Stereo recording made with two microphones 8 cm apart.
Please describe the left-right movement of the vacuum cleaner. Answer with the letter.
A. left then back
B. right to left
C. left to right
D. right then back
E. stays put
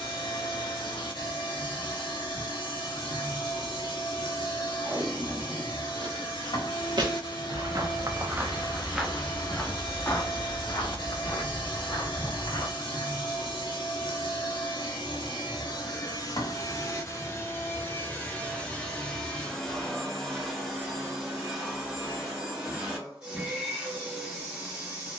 C.